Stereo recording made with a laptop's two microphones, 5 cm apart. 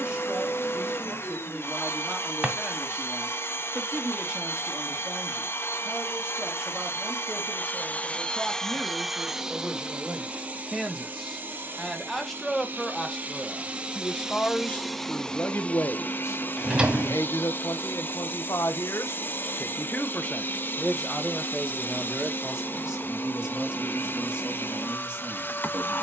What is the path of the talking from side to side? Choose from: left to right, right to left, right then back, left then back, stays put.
left then back.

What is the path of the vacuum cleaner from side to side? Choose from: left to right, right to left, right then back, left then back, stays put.
right then back.